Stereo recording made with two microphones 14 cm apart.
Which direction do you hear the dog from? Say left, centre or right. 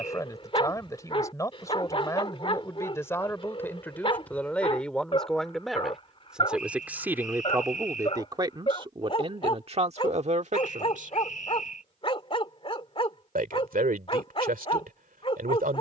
left.